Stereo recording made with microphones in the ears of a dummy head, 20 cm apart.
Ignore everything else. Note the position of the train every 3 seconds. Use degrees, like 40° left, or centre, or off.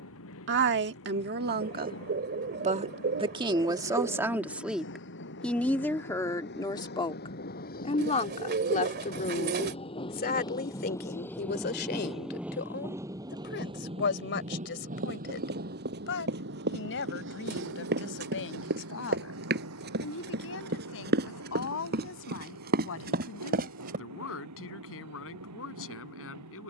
60° left, 50° left, 40° left, 20° left, 20° right, 50° right, 60° right, 70° right, 80° right.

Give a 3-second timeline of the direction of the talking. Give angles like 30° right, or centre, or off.
40° right, 10° right, 20° left, 40° left, 50° left, 50° left, 60° left, 60° left, 60° left.